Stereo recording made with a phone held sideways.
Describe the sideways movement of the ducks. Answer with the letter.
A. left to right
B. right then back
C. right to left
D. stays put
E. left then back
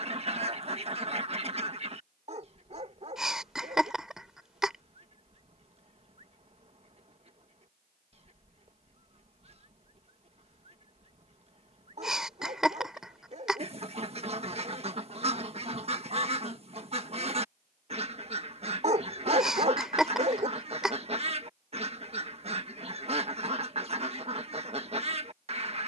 D.